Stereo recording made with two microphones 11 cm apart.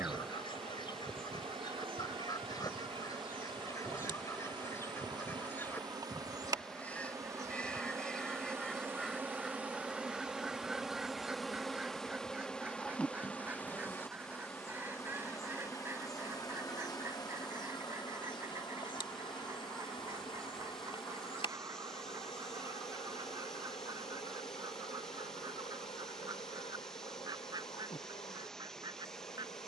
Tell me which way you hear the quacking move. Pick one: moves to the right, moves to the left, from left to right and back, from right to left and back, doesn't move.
moves to the right.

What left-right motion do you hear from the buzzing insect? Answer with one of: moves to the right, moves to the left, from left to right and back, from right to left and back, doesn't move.
moves to the left.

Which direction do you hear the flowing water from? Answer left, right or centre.
centre.